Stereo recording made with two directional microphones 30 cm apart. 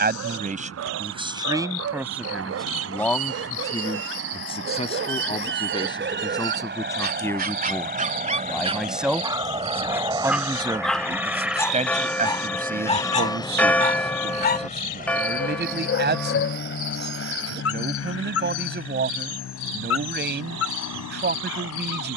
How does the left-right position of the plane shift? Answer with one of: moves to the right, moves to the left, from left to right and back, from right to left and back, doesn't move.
moves to the left.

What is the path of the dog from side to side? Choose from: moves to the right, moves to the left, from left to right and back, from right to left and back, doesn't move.
moves to the left.